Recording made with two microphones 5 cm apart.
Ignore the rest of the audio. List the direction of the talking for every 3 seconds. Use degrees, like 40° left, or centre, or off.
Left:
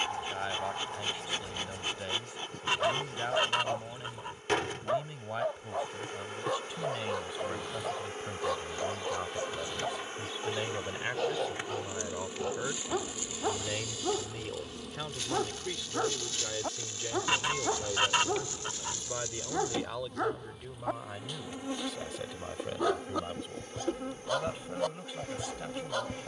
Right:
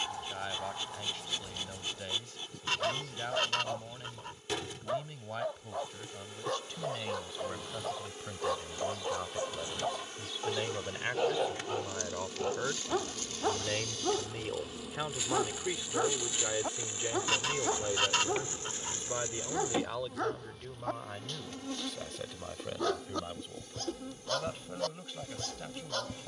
20° left, 20° left, 10° left, centre, 10° right, 20° right, centre, 10° left, 10° left.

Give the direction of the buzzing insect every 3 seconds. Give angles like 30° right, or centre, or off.
60° left, 60° left, 50° left, 30° left, 10° left, 10° right, 20° right, 40° left, 50° left.